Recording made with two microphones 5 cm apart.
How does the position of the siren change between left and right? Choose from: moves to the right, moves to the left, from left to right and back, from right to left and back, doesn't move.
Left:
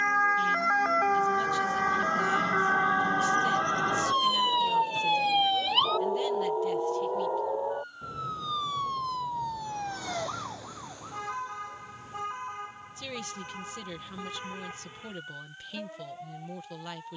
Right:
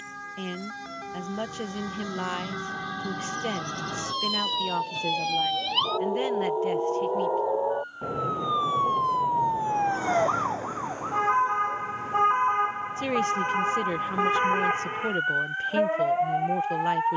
moves to the right.